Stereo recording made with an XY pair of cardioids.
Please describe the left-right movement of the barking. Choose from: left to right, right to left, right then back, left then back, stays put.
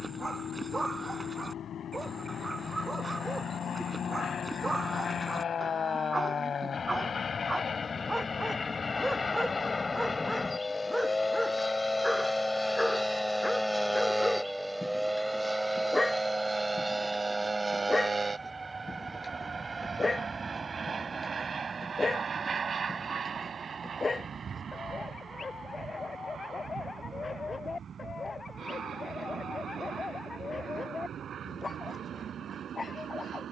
right to left.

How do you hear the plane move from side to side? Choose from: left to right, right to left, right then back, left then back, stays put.
left to right.